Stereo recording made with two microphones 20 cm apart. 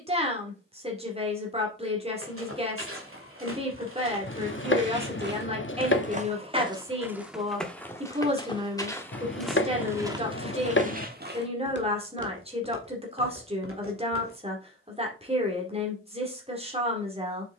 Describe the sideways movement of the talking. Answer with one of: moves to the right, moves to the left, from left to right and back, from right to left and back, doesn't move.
doesn't move.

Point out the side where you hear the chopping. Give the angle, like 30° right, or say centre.
60° left.